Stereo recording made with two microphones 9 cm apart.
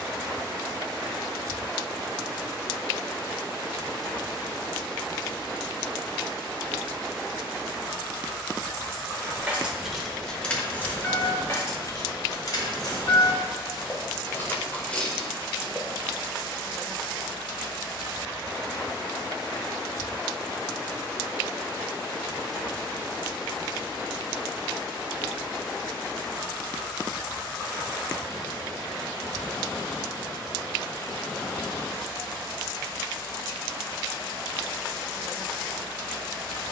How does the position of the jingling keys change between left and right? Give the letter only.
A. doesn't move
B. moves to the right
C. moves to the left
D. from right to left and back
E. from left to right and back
D.